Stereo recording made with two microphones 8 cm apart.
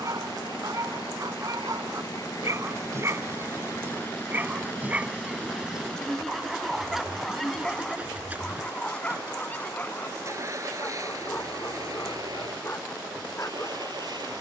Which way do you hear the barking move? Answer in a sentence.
In this clip you hear the barking move to the left.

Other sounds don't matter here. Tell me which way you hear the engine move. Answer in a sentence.
In this clip you hear the engine go from the left side to the right.